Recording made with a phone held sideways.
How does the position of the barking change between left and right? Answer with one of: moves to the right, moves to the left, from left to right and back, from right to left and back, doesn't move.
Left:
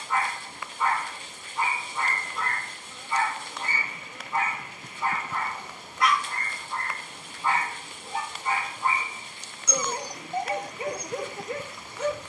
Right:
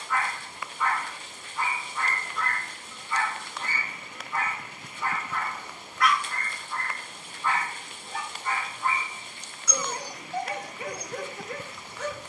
doesn't move.